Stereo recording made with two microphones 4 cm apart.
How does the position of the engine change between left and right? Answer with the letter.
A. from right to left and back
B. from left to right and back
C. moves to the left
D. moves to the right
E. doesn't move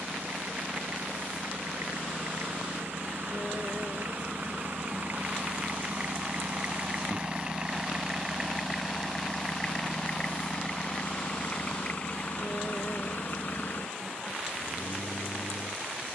C.